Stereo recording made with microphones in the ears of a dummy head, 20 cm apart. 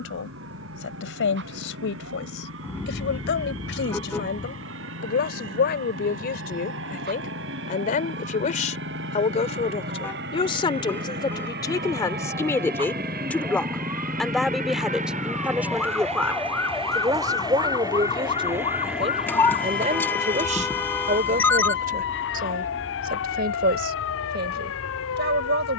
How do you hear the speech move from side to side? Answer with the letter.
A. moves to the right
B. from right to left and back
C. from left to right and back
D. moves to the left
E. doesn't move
A.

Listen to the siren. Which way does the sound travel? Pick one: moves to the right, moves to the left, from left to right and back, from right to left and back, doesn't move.
moves to the left.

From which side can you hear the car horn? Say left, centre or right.
centre.